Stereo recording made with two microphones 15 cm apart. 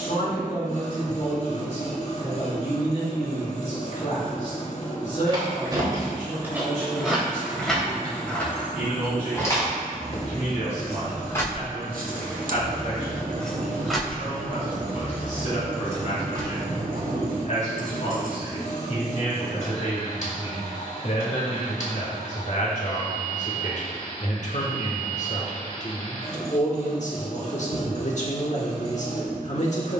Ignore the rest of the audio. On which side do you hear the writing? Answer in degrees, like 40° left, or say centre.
70° right.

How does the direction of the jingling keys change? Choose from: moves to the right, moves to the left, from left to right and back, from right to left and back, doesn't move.
from right to left and back.